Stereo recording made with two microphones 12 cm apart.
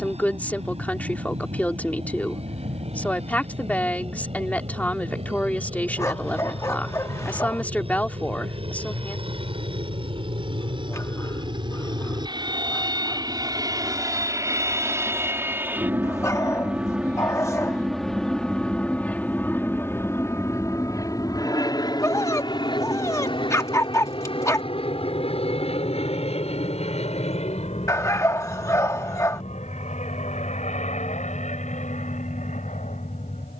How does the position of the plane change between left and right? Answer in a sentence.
You can hear the plane move to the left.